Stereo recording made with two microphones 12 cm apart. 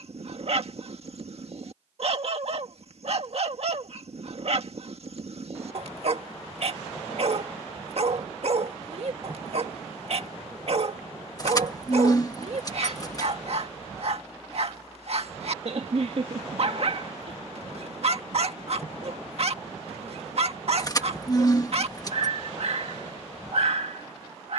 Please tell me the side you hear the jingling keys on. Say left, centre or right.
left.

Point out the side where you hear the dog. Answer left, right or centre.
right.